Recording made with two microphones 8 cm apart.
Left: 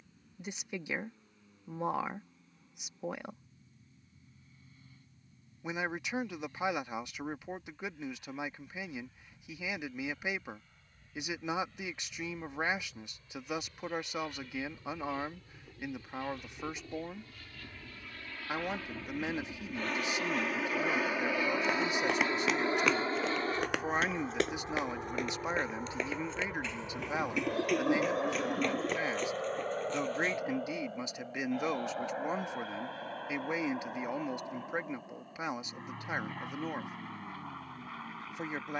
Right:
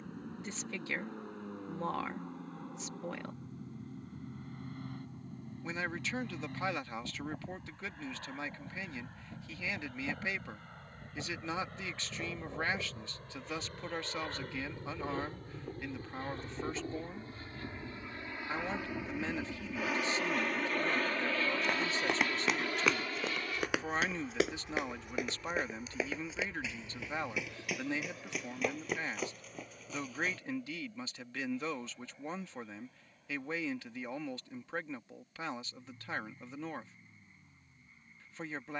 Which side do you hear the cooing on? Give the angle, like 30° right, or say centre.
70° left.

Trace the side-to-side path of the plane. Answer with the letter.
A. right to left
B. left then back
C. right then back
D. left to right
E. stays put
A.